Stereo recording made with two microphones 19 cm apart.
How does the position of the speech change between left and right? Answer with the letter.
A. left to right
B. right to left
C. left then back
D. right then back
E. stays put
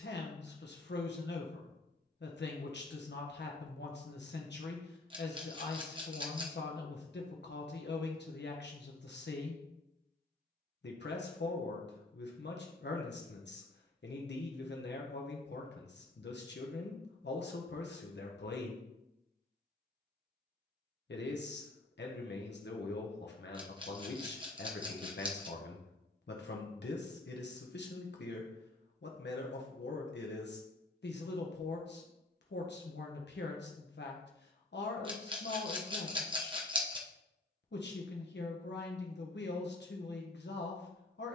E.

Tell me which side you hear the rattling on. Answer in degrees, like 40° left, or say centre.
30° right.